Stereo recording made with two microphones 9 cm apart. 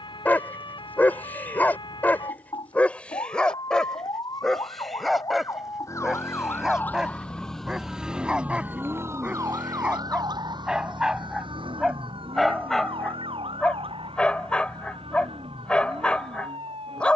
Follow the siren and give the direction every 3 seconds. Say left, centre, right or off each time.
left, left, centre, right, right, right.